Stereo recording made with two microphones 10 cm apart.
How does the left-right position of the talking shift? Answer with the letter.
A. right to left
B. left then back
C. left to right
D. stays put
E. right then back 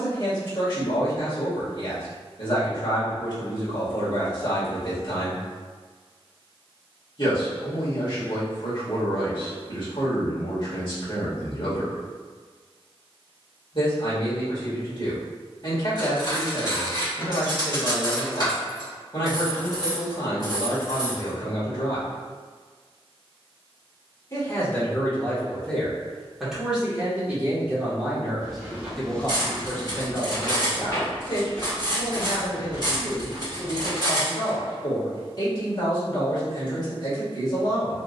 E.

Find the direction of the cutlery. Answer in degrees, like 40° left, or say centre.
40° left.